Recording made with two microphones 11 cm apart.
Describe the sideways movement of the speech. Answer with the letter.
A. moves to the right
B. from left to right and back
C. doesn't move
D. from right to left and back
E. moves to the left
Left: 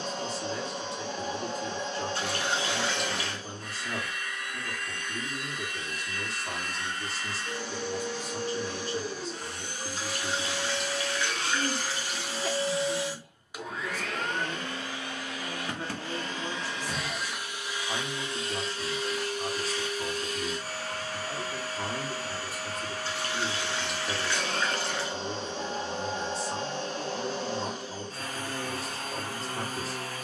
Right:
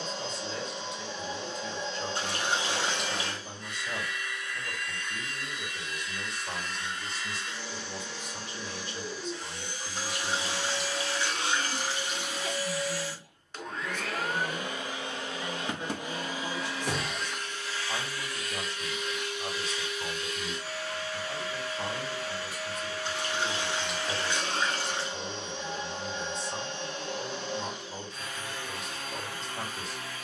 C.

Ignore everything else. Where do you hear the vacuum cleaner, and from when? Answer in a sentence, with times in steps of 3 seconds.
You can hear the vacuum cleaner on the left from 0 s, in the centre from 12 s and on the left from 18 s.